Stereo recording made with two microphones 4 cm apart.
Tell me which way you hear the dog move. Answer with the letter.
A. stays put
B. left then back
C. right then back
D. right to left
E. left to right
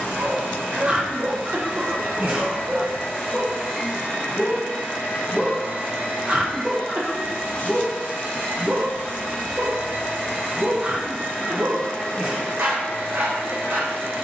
B.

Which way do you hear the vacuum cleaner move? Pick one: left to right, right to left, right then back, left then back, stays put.
stays put.